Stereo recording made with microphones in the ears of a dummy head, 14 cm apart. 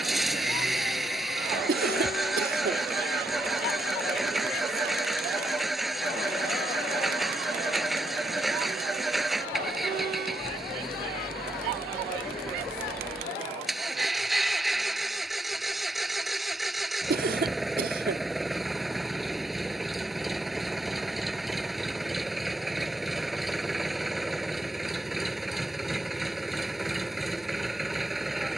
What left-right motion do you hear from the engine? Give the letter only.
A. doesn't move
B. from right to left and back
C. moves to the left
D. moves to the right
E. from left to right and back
A.